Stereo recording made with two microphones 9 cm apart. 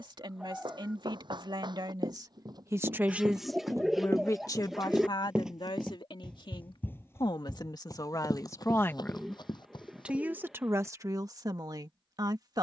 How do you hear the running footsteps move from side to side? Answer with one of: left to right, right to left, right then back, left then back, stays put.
right to left.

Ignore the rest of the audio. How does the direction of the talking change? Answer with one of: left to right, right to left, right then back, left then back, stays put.
left then back.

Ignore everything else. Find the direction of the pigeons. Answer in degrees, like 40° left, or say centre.
centre.